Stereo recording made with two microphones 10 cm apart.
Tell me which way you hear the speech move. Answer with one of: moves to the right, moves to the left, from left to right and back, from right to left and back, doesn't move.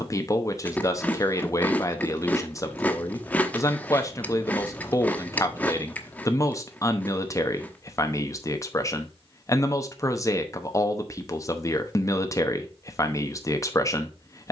doesn't move.